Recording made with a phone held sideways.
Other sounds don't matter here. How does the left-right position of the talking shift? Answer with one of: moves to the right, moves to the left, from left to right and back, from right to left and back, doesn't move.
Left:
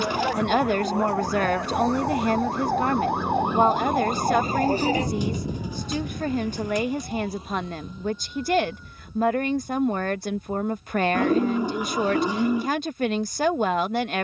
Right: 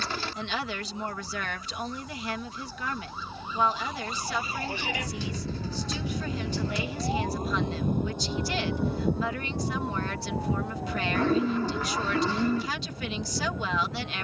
doesn't move.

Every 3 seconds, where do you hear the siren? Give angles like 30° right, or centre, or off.
80° left, 40° left, 40° right, 70° right, 80° right.